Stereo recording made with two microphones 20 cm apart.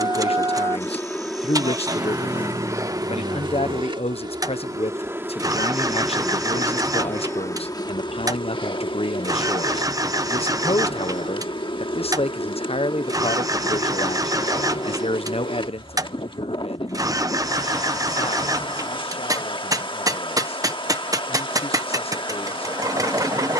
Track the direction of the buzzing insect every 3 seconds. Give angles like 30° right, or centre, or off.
centre, 20° right, 10° left, 20° left, 20° left, 20° left, 20° left, 20° left.